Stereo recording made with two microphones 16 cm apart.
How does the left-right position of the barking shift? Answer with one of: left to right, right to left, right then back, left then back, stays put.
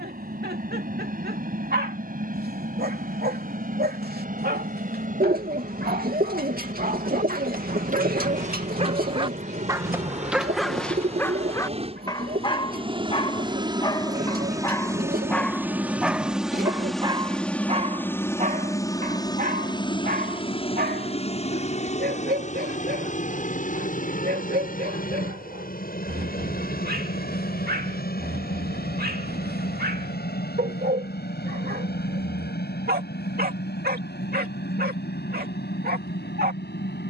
left then back.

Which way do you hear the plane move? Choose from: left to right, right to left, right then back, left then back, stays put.
right to left.